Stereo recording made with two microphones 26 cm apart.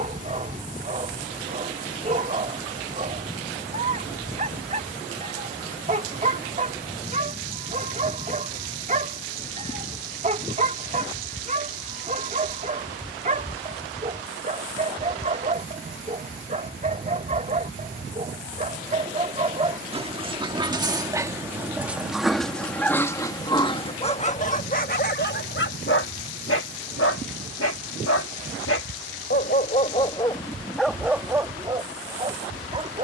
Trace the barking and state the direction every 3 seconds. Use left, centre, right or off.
right, right, right, right, right, right, right, centre, left, left, centre.